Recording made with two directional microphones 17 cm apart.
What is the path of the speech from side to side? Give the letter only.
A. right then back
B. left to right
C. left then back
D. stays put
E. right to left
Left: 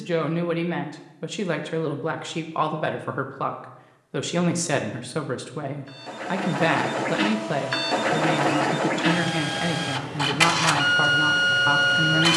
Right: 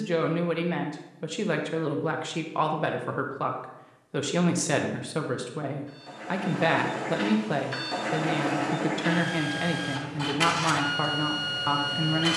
D.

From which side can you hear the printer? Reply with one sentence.
In this clip you hear the printer on the left.